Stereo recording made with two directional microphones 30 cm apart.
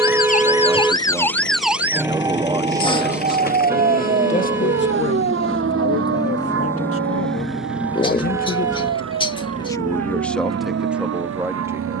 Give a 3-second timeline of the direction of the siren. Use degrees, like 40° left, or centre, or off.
centre, 40° right, 50° right, 60° right.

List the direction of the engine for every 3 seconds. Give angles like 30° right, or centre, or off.
40° left, 30° left, centre, 40° right.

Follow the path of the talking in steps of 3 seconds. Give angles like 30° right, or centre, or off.
10° right, 30° left, 40° left, centre.